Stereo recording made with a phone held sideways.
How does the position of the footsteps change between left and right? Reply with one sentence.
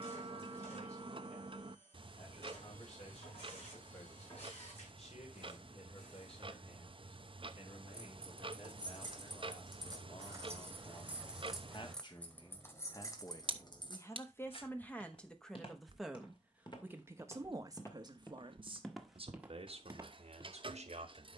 You can hear the footsteps move from left to right.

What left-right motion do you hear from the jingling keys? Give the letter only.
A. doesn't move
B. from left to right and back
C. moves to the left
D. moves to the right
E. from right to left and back
C.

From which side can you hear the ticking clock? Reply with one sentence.
In this clip you hear the ticking clock on the right.